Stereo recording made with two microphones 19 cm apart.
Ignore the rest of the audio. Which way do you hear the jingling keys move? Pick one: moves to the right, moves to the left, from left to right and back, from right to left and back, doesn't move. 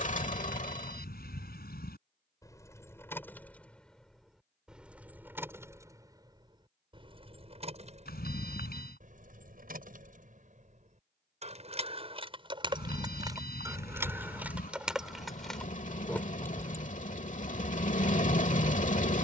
from left to right and back.